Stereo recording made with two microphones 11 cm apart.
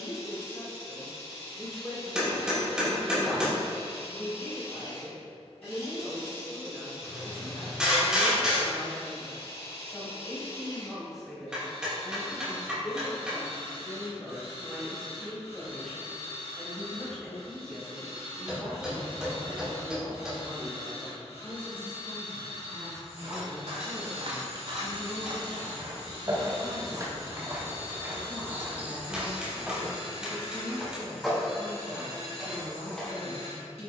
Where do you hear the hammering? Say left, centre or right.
centre.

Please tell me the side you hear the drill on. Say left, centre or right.
left.